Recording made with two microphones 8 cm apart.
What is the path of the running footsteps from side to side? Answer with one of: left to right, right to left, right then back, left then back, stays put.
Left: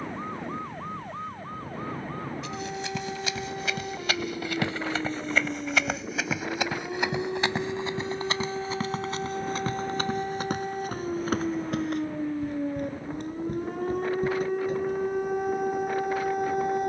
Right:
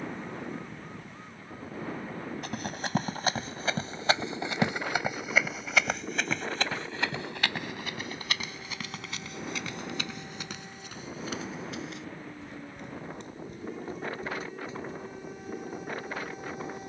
right to left.